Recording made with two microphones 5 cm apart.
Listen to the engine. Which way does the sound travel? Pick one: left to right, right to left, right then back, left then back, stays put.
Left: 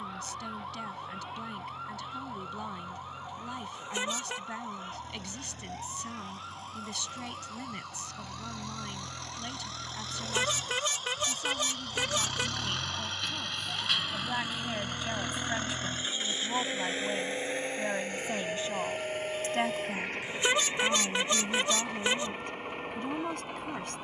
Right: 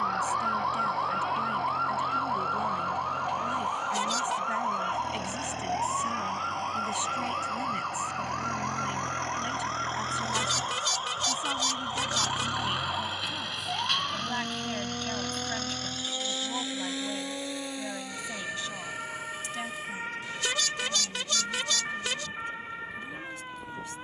right to left.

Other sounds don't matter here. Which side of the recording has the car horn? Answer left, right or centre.
left.